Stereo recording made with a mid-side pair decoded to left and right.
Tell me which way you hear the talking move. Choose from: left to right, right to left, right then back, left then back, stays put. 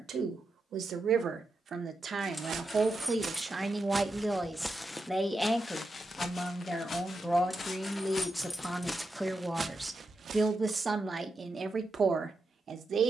left then back.